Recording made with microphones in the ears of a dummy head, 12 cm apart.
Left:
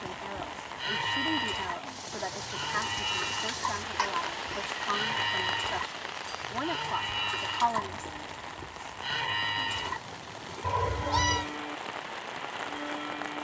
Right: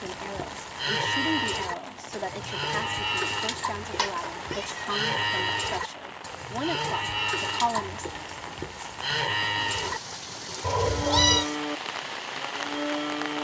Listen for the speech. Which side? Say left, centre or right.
right.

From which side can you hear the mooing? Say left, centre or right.
right.